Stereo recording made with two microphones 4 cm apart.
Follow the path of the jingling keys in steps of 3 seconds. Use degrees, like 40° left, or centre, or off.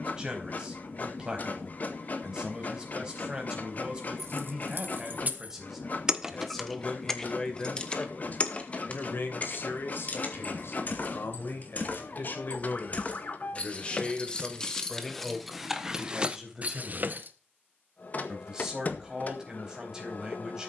off, 50° right, 10° left, 40° left, 30° left, 20° right, off.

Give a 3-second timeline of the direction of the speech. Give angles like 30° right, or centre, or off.
20° right, 20° right, 20° left, 60° left, 30° left, centre, 20° right.